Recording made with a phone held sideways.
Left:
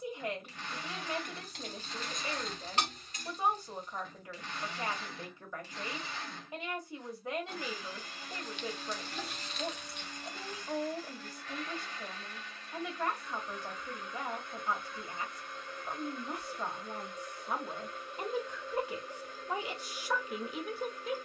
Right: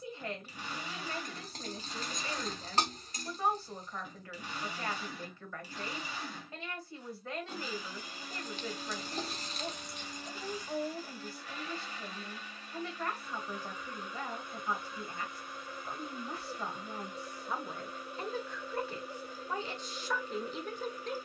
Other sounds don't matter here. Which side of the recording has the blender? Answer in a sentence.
You can hear the blender in the centre.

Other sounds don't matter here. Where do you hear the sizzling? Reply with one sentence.
You can hear the sizzling on the right.